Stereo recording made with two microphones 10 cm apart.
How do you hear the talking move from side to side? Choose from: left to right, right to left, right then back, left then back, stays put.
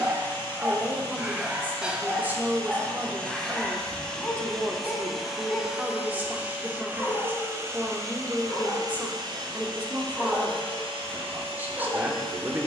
stays put.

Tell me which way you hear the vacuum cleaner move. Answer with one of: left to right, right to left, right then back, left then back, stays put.
left to right.